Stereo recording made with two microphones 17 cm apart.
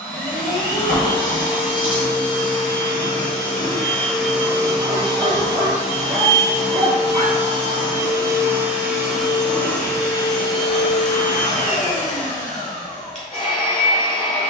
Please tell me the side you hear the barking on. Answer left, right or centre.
right.